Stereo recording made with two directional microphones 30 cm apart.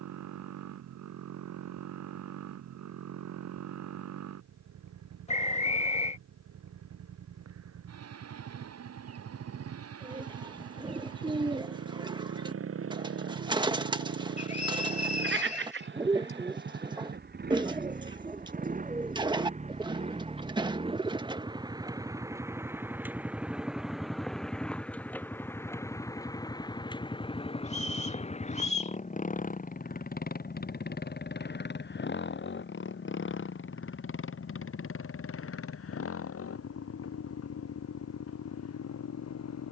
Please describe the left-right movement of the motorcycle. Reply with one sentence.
In this clip you hear the motorcycle go from the right side to the left.